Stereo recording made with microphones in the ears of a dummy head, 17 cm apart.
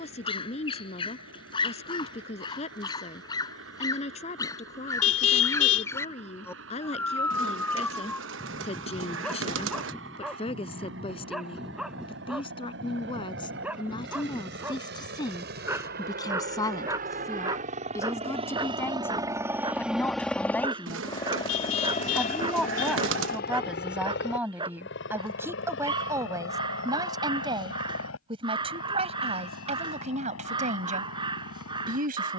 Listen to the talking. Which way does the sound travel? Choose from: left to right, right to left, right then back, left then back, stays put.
left to right.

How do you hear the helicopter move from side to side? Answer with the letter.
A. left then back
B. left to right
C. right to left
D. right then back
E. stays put
C.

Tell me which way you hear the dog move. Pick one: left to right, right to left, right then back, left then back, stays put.
left to right.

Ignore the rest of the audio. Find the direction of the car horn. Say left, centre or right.
left.